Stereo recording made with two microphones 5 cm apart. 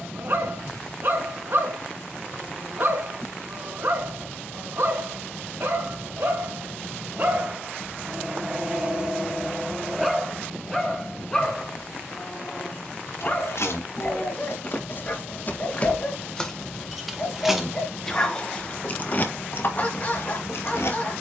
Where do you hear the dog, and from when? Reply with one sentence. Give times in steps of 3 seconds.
In this clip you hear the dog on the right from 0 s, in the centre from 9 s and on the left from 12 s.